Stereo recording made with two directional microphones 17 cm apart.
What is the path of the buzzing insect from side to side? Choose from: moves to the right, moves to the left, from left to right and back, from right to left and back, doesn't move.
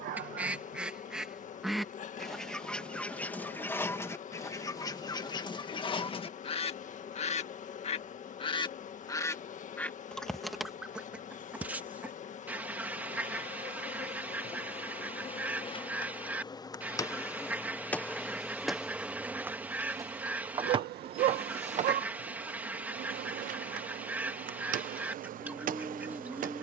moves to the right.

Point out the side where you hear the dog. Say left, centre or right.
right.